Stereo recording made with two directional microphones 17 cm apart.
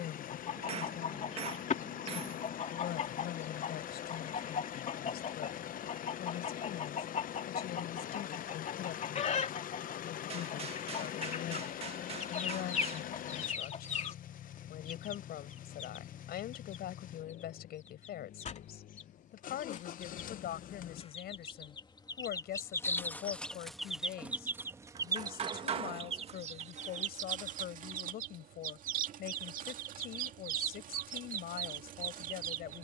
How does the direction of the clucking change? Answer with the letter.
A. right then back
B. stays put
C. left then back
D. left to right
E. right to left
D.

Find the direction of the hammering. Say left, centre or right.
right.